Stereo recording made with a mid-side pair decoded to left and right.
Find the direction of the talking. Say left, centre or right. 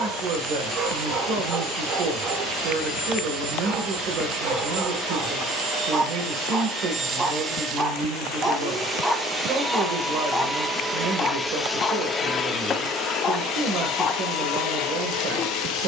right.